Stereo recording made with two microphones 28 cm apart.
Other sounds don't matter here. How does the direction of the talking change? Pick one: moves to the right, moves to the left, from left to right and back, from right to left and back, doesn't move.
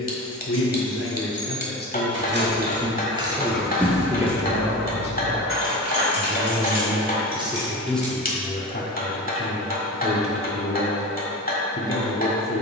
from left to right and back.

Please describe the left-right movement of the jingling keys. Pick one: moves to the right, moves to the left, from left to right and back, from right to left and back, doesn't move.
moves to the left.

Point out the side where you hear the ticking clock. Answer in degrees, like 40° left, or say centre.
30° left.